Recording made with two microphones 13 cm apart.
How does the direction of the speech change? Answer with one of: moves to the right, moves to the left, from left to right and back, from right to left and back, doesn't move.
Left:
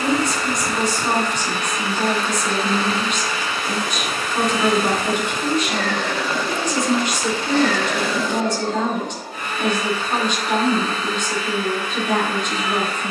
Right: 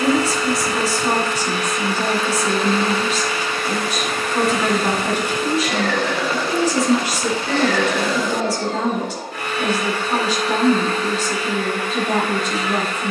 doesn't move.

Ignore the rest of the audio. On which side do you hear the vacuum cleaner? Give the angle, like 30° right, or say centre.
80° right.